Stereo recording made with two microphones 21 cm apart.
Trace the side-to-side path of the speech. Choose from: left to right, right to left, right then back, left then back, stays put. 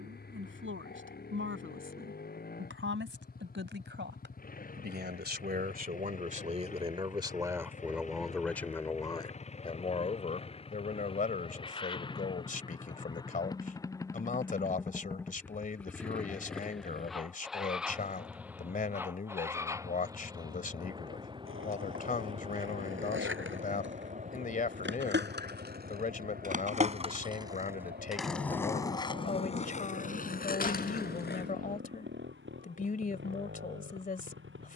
right to left.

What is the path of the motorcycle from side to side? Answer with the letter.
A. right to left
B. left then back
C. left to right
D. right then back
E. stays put
C.